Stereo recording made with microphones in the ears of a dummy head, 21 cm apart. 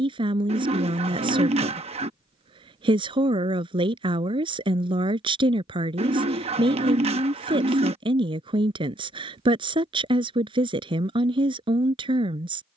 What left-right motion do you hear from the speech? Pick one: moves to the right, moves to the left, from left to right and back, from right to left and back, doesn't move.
doesn't move.